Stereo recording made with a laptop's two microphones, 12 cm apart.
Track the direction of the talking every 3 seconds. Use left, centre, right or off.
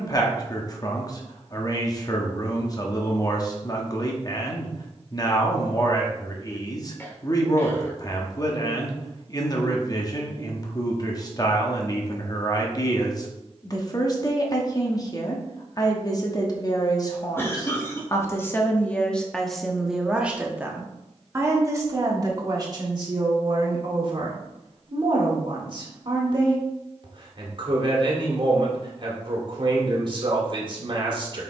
left, left, left, left, left, left, centre, right, right, right, right.